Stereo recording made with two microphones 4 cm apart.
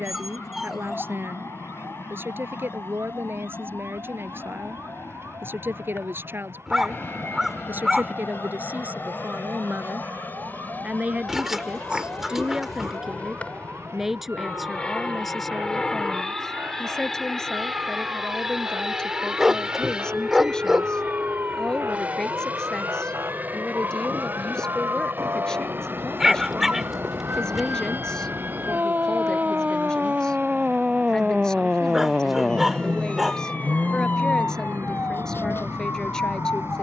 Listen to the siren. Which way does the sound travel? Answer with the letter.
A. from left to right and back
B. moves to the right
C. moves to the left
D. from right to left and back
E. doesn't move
C.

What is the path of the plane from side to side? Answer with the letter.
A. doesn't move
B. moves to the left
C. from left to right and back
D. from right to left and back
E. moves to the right
E.